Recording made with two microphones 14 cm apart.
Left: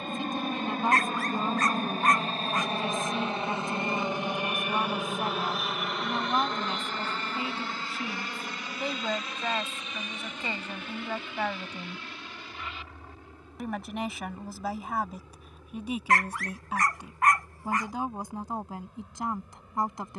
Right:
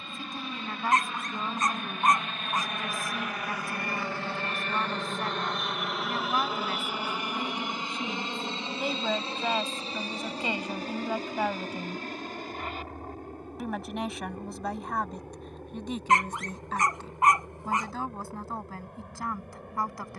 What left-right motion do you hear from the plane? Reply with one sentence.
In this clip you hear the plane move from left to right.